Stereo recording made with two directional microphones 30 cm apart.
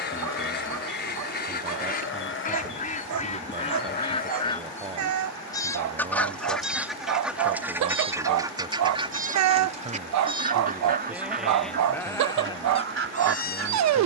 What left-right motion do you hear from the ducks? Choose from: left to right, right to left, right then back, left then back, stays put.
left to right.